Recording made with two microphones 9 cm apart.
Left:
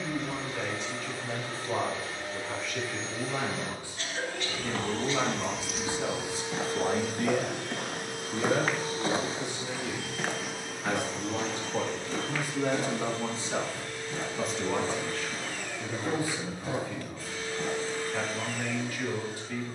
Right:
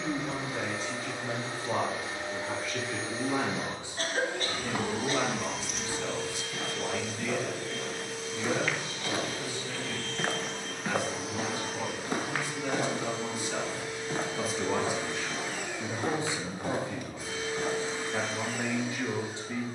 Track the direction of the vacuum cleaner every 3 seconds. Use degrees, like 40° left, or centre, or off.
20° right, 10° right, 50° left, 10° left, 20° right, 20° right, 20° right.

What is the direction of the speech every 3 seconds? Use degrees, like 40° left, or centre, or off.
40° right, 10° right, 50° left, 70° left, 20° left, 20° right, 20° right.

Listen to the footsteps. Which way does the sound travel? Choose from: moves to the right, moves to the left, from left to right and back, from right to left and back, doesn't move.
moves to the right.